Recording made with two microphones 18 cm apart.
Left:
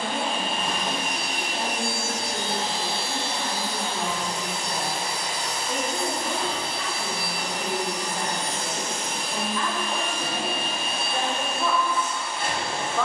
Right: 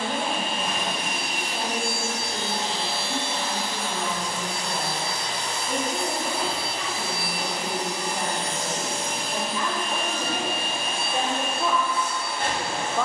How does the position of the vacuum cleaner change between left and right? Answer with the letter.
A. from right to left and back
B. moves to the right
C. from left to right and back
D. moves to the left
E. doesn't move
B.